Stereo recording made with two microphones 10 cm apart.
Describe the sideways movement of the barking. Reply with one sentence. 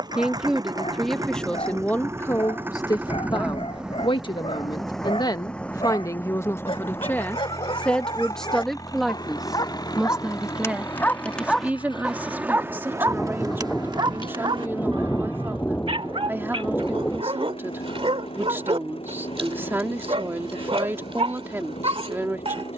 You can hear the barking move to the right.